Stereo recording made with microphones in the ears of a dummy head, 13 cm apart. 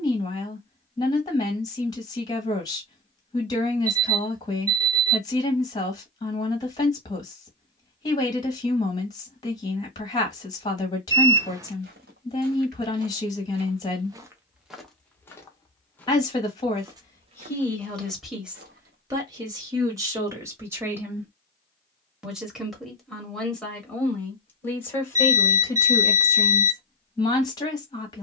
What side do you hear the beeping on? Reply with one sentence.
In this clip you hear the beeping on the right.